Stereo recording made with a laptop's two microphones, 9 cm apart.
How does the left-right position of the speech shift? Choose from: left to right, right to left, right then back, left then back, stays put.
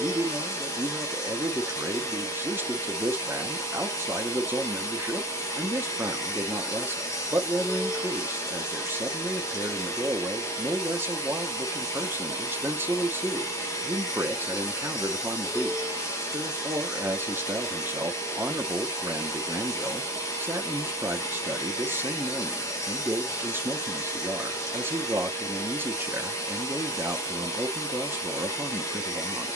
stays put.